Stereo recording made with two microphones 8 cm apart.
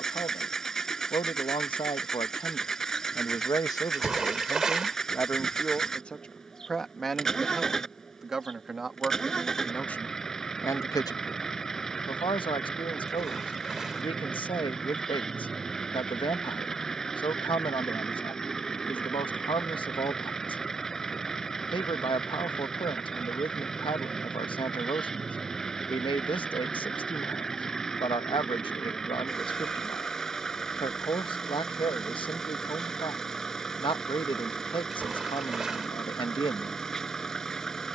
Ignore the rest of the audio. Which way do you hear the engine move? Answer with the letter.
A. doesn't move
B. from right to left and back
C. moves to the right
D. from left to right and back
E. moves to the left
A.